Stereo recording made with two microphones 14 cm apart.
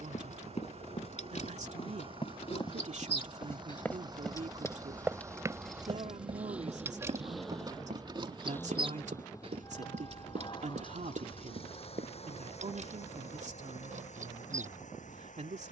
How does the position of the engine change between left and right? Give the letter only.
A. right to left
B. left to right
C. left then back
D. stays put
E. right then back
A.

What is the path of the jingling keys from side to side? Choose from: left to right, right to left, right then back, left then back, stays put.
left to right.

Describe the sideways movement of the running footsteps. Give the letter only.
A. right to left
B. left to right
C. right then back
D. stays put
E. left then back
B.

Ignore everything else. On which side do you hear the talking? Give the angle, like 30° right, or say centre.
60° right.